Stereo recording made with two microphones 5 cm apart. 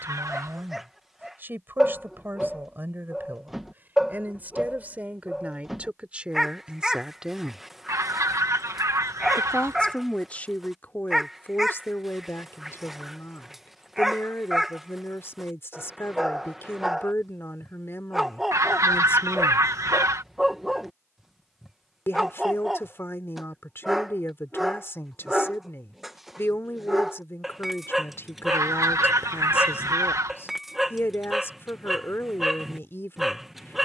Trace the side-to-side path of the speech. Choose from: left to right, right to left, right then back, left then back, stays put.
right to left.